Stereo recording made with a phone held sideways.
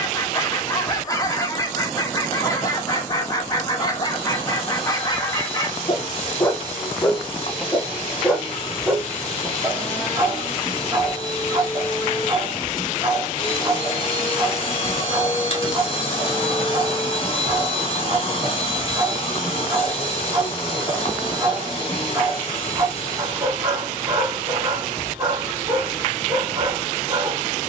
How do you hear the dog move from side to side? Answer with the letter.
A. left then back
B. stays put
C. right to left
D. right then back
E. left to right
E.